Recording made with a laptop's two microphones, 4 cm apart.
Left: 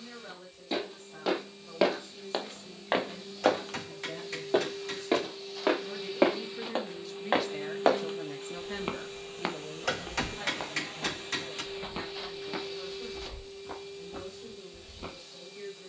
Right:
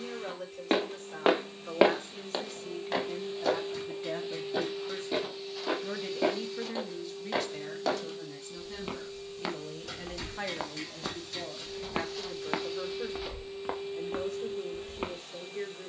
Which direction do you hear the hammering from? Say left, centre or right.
left.